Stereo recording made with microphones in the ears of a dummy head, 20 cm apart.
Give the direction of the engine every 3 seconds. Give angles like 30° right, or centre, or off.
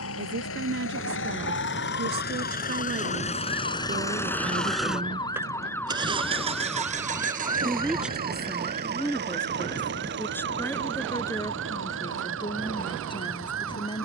50° left, 10° left, 40° right, 50° right, 60° right.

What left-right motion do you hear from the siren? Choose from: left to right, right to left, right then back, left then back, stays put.
left to right.